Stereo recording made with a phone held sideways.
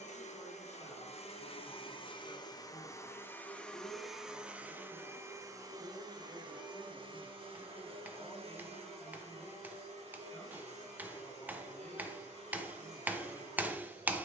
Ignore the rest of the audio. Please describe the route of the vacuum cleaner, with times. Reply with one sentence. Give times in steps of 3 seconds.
You can hear the vacuum cleaner on the left from 0 s, in the centre from 3 s and on the right from 6 s.